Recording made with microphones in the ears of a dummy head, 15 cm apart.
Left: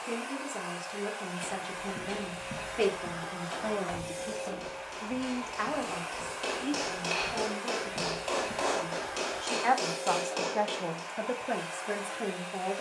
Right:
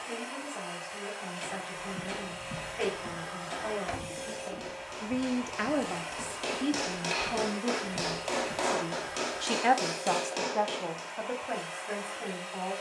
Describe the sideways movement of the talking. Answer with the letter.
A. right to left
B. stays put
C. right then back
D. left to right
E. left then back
C.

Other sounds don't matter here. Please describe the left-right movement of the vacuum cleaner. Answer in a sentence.
You can hear the vacuum cleaner stay put.